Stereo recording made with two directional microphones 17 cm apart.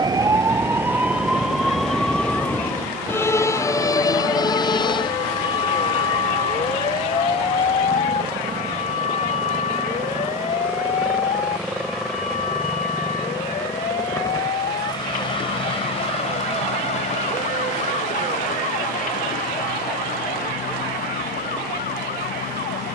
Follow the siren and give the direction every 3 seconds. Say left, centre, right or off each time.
centre, left, left, left, left, left, left, left.